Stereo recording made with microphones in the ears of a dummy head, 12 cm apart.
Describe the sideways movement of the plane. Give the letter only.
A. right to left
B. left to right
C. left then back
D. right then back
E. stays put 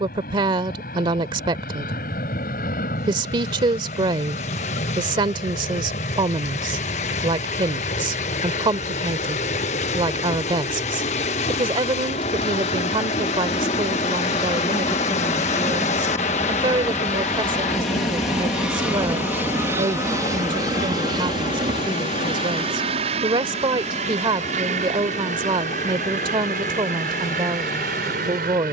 B.